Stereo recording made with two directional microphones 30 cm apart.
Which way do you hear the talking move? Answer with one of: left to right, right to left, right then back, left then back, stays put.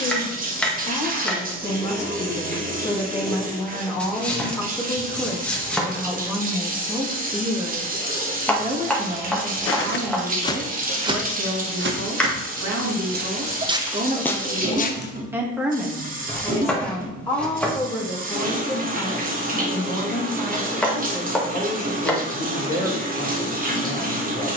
right then back.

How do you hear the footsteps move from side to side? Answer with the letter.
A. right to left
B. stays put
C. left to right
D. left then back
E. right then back
E.